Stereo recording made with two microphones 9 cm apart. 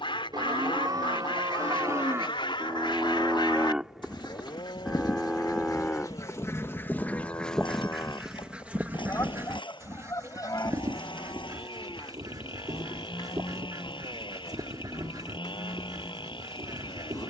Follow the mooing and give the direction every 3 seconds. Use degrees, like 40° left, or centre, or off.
40° right, centre, 30° left, 40° left, 50° left, 50° left.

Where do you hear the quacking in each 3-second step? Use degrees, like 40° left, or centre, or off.
80° left, 60° left, 10° left, 40° right, 50° right, 50° right.